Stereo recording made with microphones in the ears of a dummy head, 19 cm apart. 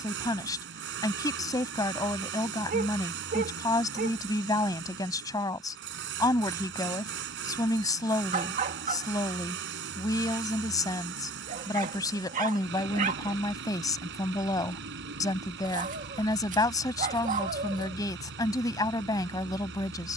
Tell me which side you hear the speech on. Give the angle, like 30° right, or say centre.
20° left.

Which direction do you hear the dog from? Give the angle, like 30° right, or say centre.
40° right.